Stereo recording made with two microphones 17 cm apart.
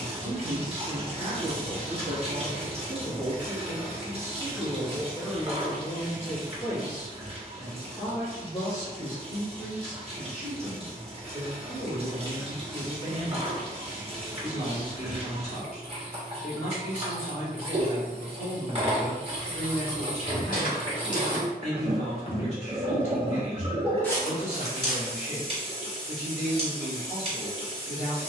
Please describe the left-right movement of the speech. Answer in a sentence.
In this clip you hear the speech move from right to left.